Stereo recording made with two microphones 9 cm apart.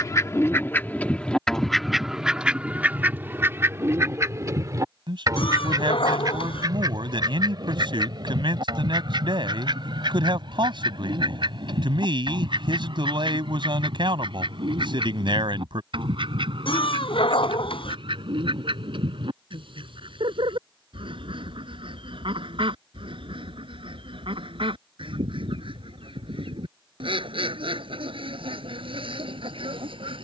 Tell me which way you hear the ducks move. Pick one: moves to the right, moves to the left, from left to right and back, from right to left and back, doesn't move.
moves to the right.